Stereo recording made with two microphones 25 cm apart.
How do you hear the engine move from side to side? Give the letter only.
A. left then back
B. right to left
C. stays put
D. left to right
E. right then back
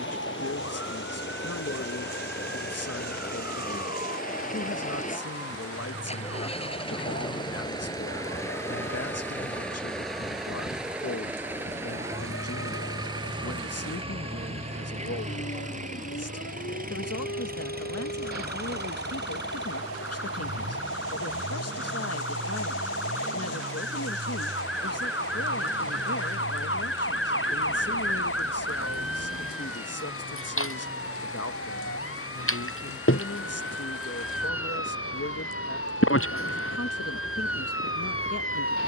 D.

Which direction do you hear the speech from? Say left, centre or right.
left.